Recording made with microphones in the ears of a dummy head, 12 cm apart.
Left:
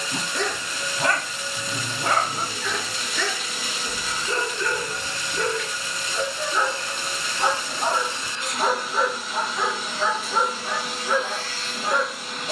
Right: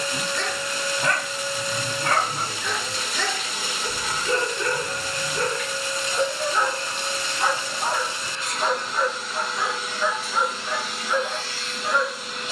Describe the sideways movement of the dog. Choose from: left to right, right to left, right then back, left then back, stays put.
right then back.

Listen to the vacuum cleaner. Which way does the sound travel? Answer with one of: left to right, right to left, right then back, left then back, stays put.
right to left.